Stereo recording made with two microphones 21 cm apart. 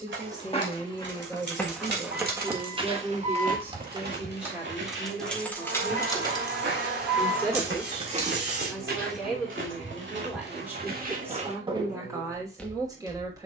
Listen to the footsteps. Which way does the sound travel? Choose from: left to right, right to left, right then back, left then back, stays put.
right then back.